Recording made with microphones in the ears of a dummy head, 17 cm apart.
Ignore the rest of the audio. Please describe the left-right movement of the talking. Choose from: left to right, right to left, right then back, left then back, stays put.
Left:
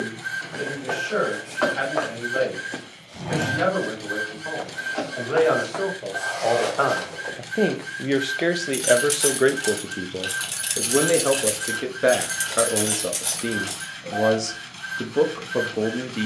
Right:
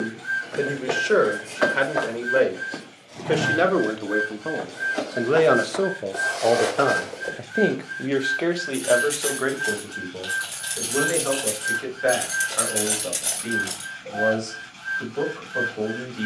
right to left.